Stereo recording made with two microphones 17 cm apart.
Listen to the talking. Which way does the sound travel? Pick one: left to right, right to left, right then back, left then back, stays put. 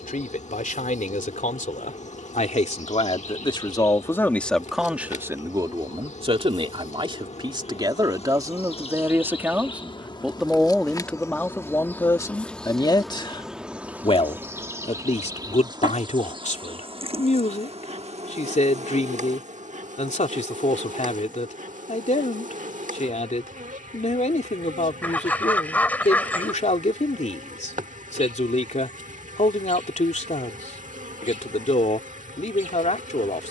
right then back.